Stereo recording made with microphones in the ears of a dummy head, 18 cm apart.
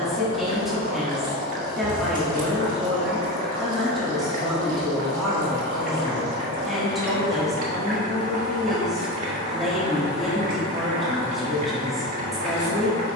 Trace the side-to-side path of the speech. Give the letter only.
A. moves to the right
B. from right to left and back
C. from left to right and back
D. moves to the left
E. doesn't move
E.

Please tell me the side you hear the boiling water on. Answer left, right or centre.
right.